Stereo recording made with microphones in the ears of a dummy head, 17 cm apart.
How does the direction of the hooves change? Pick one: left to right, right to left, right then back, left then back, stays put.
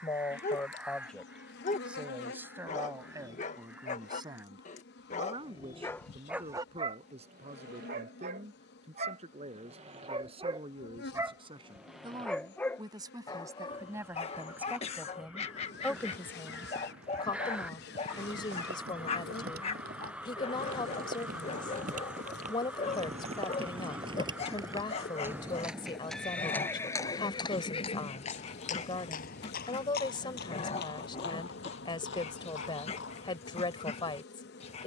right to left.